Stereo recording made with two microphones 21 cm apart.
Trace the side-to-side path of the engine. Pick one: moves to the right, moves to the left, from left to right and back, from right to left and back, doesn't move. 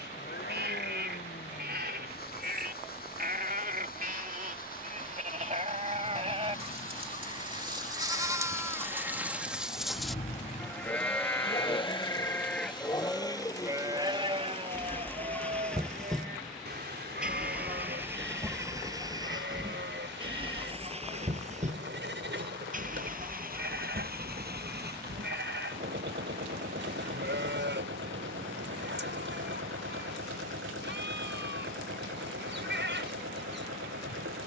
moves to the right.